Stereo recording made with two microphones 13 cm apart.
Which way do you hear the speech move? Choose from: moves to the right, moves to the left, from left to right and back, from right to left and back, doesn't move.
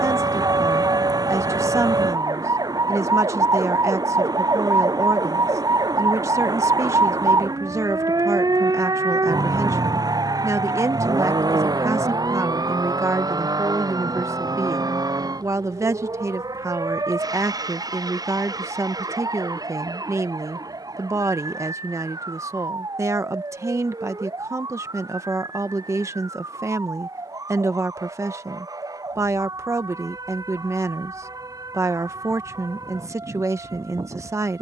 doesn't move.